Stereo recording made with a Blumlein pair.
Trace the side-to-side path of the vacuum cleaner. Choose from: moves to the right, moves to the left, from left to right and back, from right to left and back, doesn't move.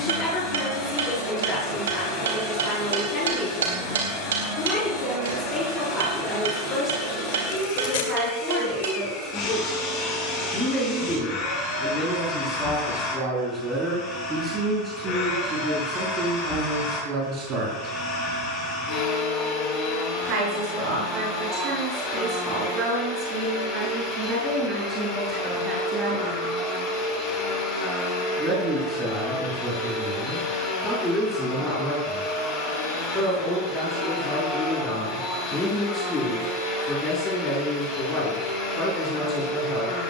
doesn't move.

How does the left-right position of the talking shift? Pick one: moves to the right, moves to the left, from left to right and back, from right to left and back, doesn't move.
from left to right and back.